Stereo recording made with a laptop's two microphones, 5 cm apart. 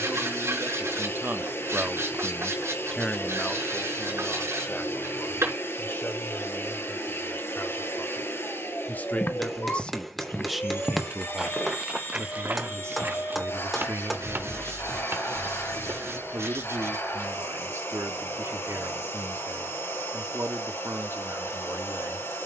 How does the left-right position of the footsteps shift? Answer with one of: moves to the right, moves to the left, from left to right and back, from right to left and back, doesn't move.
moves to the right.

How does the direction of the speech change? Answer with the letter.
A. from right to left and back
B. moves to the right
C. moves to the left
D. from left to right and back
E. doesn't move
A.